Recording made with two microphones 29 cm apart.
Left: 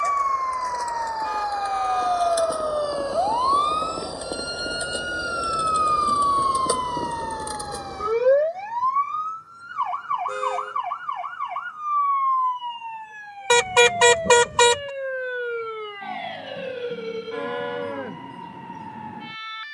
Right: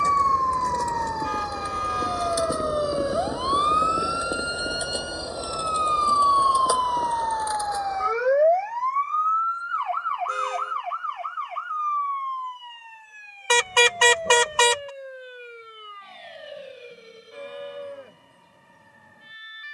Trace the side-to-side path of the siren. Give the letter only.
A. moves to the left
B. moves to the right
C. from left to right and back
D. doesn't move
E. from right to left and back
A.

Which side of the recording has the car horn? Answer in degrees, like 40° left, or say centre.
50° left.